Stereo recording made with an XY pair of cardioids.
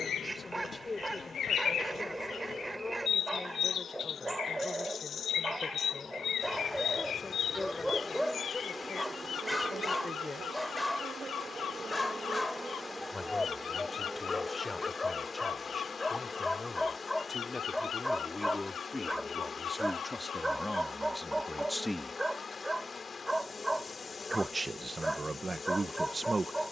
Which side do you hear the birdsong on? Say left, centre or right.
left.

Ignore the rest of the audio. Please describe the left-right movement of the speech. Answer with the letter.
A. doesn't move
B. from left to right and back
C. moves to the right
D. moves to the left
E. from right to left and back
C.